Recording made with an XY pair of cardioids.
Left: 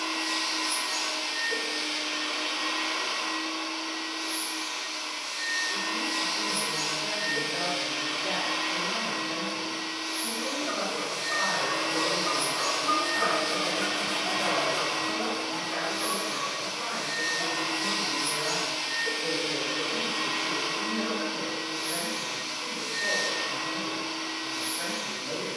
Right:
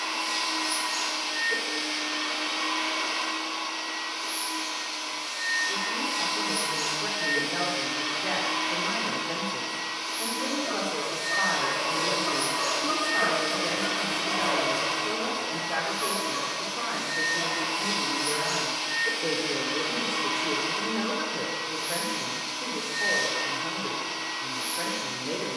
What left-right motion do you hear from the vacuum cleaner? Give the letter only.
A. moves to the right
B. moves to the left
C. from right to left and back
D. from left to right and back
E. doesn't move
E.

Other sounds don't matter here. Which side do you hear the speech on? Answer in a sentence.
You can hear the speech on the right.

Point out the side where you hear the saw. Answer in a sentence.
You can hear the saw on the left.